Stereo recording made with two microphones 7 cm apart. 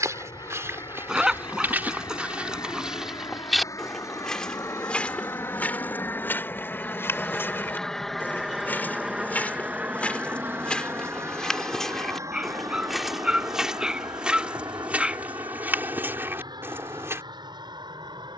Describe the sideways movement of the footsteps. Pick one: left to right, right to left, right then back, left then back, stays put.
left then back.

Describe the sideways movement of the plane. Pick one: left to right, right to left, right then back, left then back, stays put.
left to right.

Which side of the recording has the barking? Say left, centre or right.
centre.